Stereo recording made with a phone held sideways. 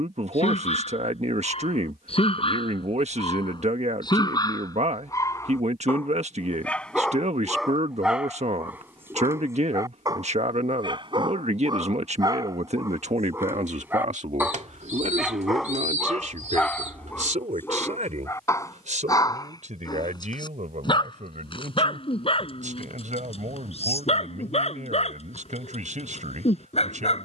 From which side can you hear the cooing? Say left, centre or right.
right.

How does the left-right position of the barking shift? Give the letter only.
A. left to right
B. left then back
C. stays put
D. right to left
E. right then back
E.